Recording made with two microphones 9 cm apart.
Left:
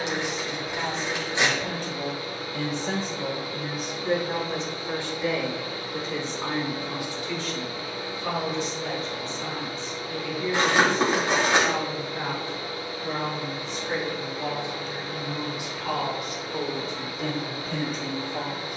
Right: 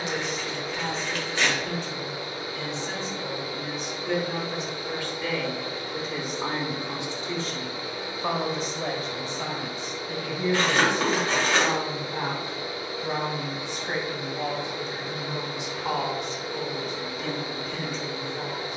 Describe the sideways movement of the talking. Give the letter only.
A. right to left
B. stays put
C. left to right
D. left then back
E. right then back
E.